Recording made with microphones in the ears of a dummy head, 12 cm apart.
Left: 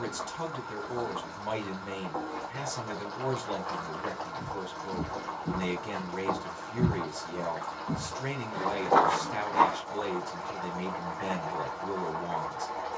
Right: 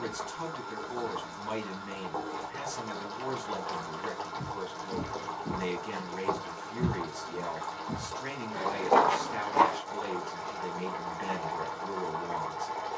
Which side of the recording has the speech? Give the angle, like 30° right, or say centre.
50° left.